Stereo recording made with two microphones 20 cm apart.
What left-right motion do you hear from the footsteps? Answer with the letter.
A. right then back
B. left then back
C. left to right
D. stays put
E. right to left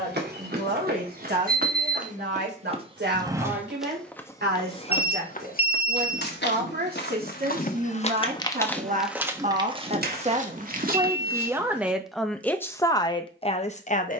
B.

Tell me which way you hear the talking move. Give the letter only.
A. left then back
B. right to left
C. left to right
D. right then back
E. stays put
B.